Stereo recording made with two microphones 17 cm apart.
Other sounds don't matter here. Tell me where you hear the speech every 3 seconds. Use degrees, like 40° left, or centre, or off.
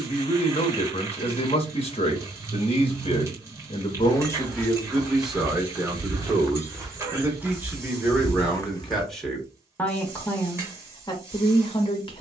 30° left, 10° left, 10° right, 20° left.